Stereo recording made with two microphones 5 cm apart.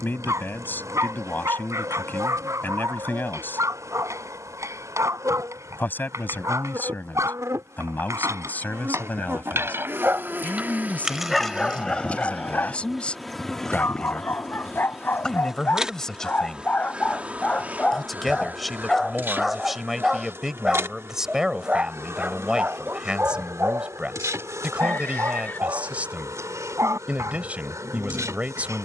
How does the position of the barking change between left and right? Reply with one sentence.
You can hear the barking go left and come back.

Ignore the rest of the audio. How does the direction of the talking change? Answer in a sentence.
You can hear the talking move from left to right.